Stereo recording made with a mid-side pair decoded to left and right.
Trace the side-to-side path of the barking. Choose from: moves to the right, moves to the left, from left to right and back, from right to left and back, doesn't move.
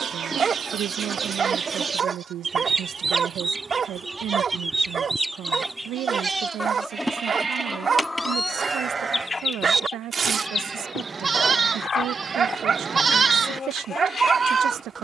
doesn't move.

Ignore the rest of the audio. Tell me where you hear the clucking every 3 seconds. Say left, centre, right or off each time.
right, centre, centre, left, left.